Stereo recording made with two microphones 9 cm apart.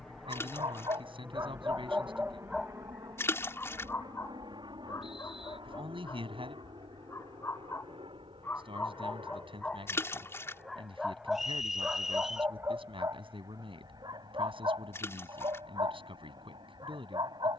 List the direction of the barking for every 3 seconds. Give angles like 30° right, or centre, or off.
30° right, 30° left, 30° left, centre, 40° right, 50° right.